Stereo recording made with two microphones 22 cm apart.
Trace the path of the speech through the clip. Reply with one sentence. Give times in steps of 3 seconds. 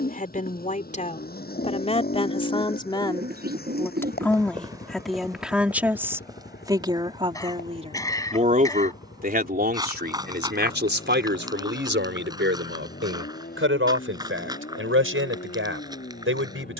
In this clip you hear the speech on the left from 0 s, in the centre from 3 s and on the right from 6 s.